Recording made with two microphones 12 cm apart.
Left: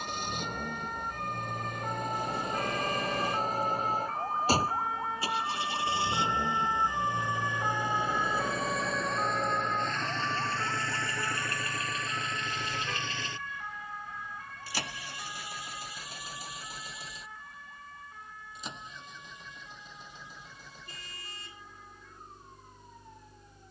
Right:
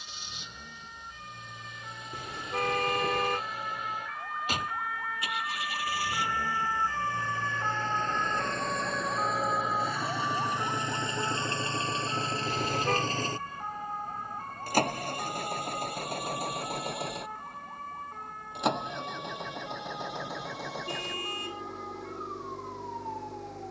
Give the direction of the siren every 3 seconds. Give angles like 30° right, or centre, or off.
60° left, 30° left, 10° left, 20° right, 40° right, 40° right, 50° right, 50° right.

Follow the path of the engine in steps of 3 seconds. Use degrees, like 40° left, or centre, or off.
50° left, 30° left, 10° left, 10° right, 40° right, 60° right, 70° right, 80° right.